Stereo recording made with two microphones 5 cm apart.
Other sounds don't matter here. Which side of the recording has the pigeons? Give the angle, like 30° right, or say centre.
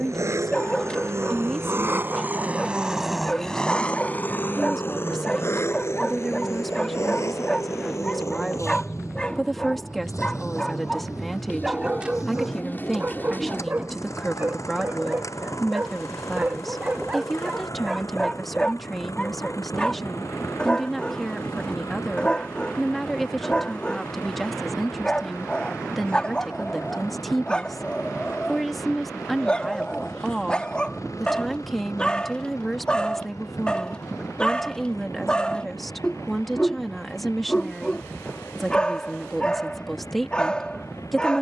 40° left.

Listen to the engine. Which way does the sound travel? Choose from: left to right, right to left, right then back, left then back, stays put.
right to left.